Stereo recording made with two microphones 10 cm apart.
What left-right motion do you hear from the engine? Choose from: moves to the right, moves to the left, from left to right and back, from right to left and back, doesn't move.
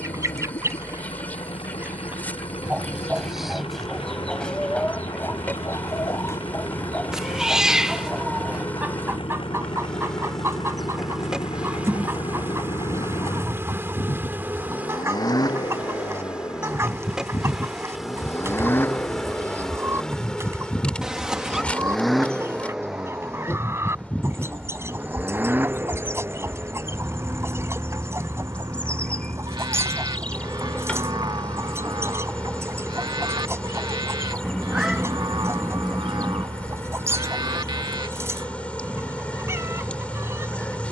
moves to the right.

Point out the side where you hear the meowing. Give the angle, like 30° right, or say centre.
10° right.